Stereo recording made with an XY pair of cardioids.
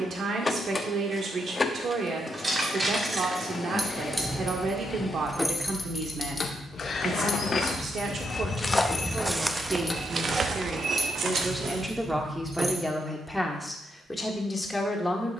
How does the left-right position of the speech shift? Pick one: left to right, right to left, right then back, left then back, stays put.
right to left.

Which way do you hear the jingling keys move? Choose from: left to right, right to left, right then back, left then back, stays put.
left then back.